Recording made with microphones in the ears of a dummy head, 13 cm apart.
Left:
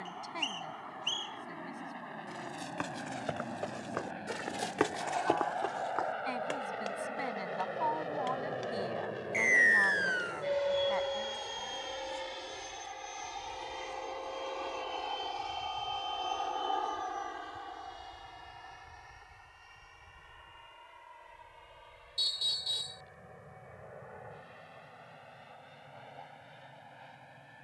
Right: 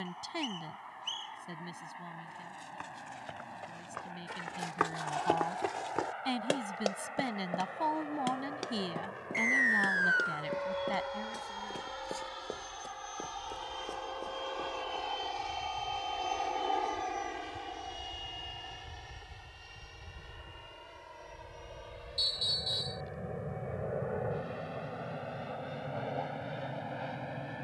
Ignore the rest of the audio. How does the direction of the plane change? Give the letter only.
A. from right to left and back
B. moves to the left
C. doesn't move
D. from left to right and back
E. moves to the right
E.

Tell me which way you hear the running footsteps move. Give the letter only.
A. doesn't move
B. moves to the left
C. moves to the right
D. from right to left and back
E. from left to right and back
C.